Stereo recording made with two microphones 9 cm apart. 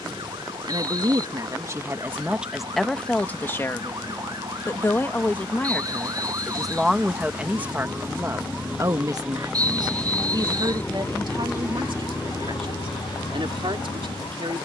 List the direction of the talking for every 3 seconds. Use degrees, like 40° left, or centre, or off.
30° right, 20° left, 20° right, 50° right, 70° right.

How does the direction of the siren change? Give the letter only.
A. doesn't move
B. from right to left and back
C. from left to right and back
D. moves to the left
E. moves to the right
D.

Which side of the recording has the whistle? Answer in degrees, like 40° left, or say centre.
40° right.